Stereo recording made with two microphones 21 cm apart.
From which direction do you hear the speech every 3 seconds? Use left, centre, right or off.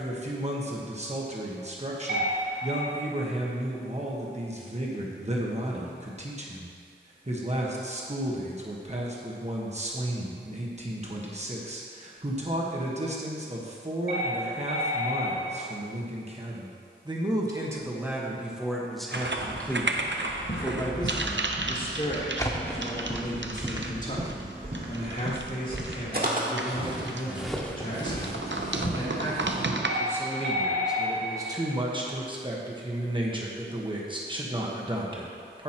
right, right, right, right, right, right, centre, left, left, left, centre, right.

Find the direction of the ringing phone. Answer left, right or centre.
right.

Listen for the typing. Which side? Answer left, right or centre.
right.